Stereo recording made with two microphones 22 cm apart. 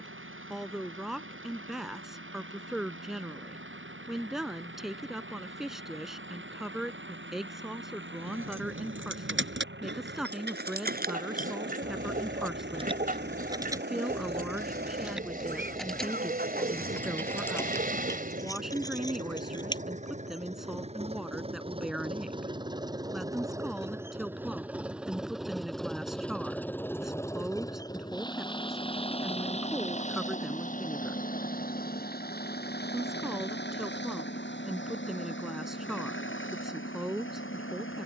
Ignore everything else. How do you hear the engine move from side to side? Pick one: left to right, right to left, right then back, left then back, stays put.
right to left.